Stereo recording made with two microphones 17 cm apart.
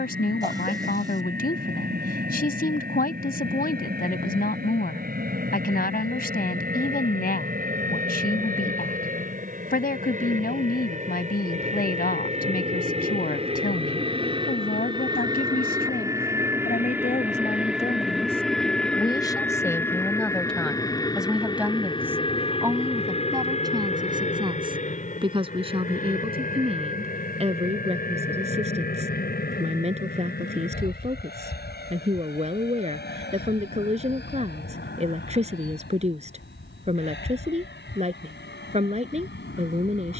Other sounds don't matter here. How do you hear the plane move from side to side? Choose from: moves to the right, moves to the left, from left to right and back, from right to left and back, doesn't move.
moves to the left.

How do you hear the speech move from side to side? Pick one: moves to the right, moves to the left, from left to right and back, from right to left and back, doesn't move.
moves to the right.